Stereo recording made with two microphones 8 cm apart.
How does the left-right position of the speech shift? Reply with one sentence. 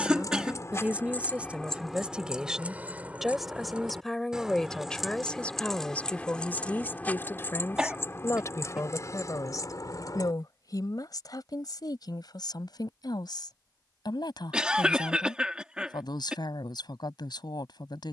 In this clip you hear the speech travel towards the left.